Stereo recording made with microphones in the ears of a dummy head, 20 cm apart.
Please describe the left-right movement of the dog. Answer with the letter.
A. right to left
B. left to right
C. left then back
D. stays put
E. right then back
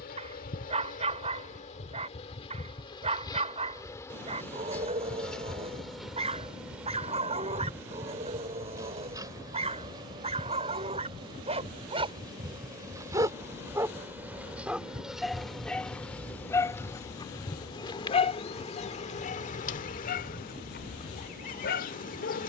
A.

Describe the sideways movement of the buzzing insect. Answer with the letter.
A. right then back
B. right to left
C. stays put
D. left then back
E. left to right
A.